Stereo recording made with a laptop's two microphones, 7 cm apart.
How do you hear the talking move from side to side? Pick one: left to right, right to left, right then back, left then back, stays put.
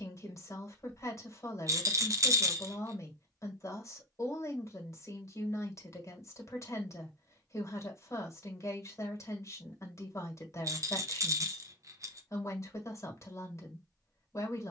stays put.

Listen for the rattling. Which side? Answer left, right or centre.
right.